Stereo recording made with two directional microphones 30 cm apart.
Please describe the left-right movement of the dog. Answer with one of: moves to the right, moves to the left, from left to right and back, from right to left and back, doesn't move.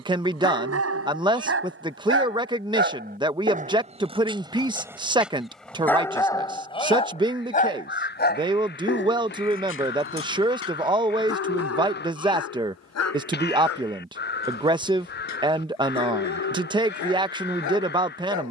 moves to the left.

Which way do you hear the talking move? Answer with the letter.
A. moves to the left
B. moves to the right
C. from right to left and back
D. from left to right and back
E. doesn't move
E.